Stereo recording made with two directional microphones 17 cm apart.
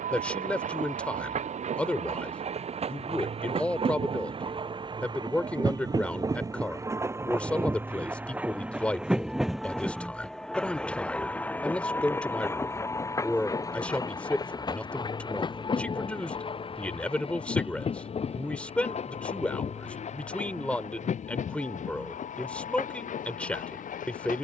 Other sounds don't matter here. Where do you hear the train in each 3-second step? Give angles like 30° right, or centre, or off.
40° right, 30° right, 10° right, centre, 20° left, 30° left, 40° left, 50° left.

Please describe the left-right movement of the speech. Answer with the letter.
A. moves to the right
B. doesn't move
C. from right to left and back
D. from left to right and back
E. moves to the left
B.